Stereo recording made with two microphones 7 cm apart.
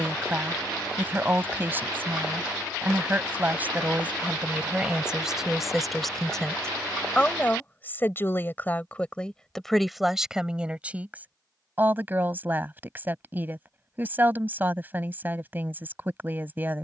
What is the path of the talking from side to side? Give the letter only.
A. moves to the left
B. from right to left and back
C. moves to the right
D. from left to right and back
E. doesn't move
B.